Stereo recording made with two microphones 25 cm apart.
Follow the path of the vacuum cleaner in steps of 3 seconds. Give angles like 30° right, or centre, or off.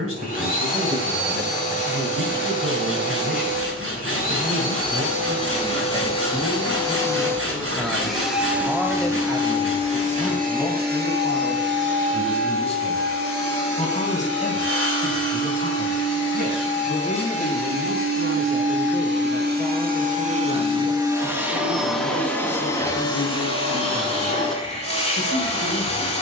30° left, 30° left, 10° left, 30° right, 60° right, 70° right, 40° right, 10° left, 30° left.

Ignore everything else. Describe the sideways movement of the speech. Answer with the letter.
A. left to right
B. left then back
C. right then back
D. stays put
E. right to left
E.